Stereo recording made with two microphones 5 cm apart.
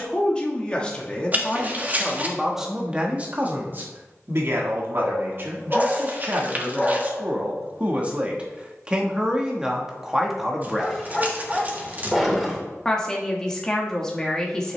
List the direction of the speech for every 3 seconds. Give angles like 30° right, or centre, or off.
10° left, 40° right, 30° right, 10° right, 10° left.